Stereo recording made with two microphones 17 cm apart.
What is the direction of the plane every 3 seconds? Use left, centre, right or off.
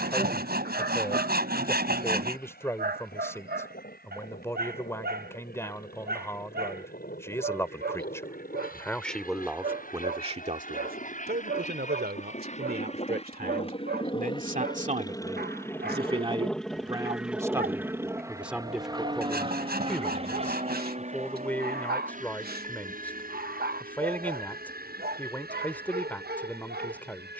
left, left, left, left, left, centre, right, right, right.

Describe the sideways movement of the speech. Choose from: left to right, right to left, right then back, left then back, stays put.
right then back.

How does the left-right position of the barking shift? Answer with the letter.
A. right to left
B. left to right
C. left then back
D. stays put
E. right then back
D.